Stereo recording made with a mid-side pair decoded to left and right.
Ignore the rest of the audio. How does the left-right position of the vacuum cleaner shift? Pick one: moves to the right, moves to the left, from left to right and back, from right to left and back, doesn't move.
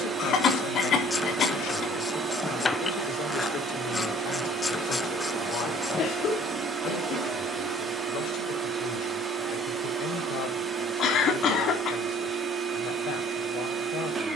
doesn't move.